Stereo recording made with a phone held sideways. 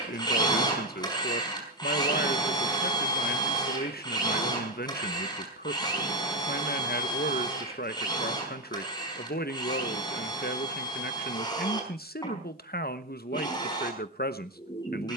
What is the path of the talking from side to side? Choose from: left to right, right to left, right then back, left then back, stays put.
stays put.